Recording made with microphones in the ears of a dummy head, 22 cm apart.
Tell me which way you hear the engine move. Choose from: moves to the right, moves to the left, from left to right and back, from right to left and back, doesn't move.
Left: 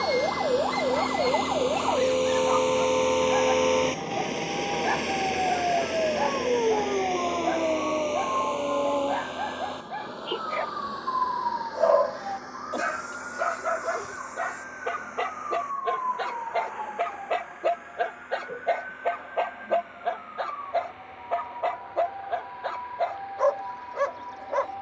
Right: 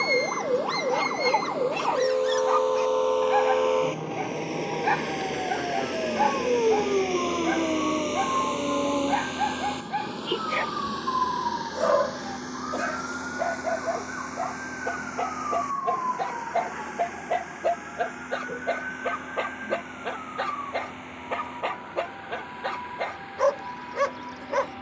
moves to the right.